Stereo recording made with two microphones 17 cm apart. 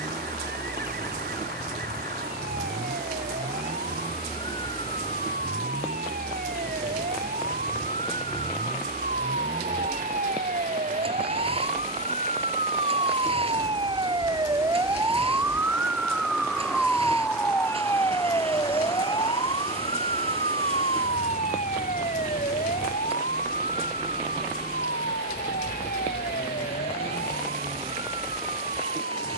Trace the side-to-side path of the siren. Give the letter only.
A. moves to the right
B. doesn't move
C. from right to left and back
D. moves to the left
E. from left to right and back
D.